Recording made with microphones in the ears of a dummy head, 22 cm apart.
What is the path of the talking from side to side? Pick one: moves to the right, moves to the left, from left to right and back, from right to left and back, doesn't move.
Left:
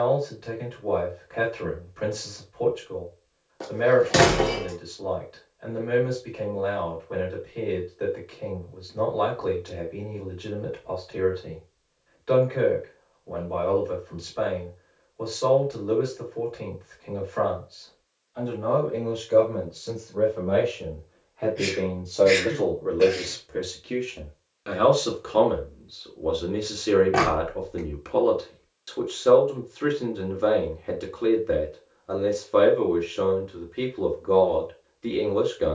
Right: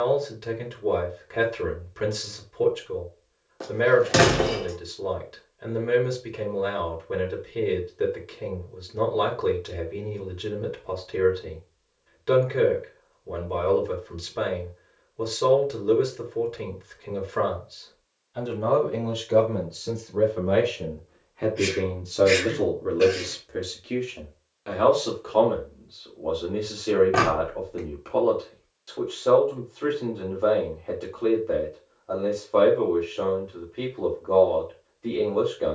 moves to the left.